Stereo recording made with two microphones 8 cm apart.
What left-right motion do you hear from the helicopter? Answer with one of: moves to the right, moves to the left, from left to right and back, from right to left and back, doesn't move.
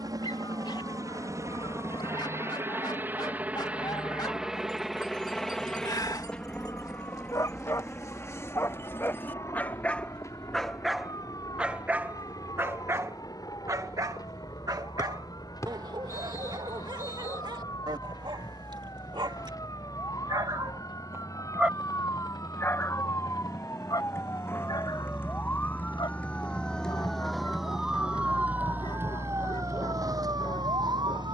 moves to the left.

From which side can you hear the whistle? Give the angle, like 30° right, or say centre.
40° left.